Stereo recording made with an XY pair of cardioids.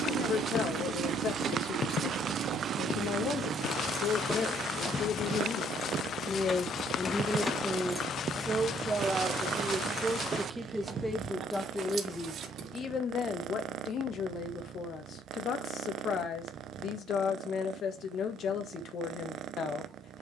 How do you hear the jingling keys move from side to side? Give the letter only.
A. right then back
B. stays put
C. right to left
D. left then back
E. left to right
D.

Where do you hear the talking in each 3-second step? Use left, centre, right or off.
left, left, centre, centre, left, left, left.